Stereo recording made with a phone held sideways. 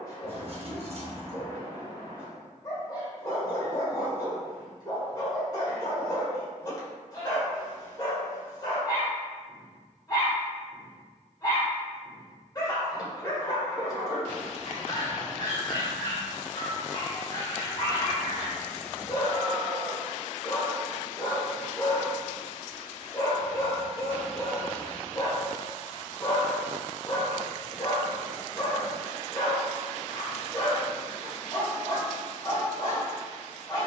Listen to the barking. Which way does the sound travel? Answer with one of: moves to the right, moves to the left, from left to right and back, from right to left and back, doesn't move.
doesn't move.